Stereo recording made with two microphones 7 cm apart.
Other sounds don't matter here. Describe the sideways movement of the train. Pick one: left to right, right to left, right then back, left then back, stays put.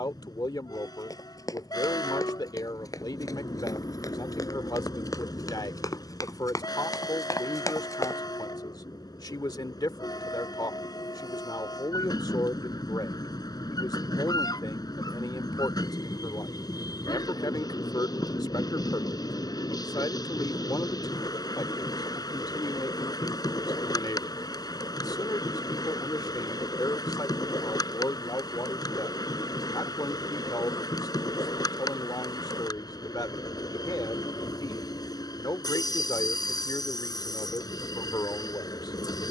stays put.